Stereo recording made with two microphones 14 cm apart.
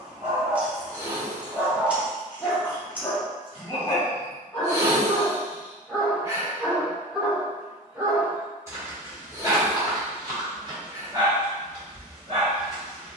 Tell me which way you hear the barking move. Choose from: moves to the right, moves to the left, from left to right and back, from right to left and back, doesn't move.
from right to left and back.